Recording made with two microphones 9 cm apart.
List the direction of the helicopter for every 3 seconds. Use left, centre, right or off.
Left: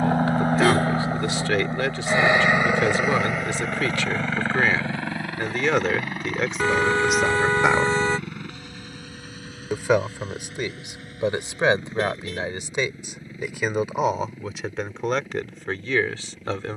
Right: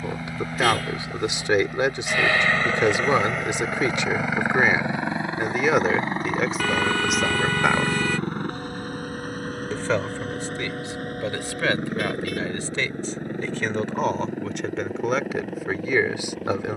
left, centre, right, right, right, right.